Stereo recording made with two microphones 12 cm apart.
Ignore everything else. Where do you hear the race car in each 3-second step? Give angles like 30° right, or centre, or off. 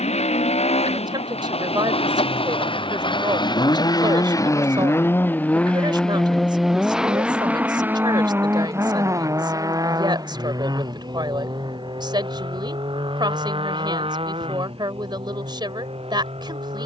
60° left, 30° left, 10° right, 30° right, 40° right, 50° right.